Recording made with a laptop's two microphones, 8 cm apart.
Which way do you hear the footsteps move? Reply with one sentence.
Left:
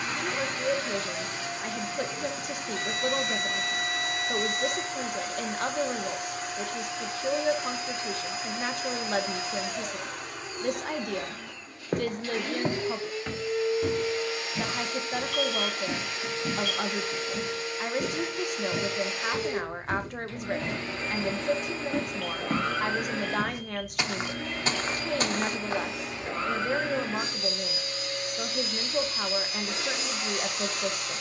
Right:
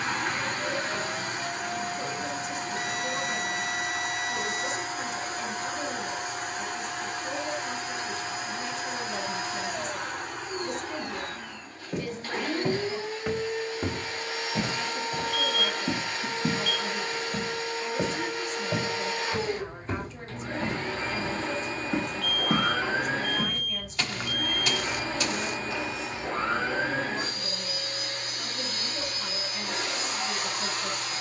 You can hear the footsteps move from left to right and back again.